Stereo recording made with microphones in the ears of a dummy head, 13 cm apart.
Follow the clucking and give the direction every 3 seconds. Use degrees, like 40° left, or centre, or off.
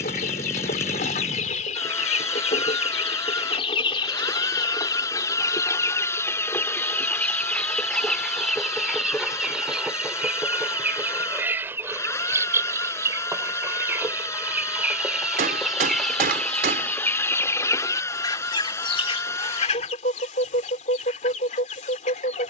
50° left, 30° left, 10° left, 10° right, 20° right, 10° left, 40° left, 50° left.